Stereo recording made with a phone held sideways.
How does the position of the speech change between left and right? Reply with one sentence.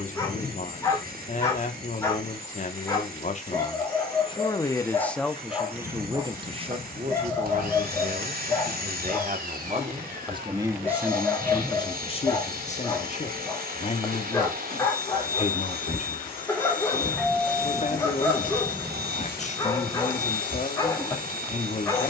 You can hear the speech move from left to right and back again.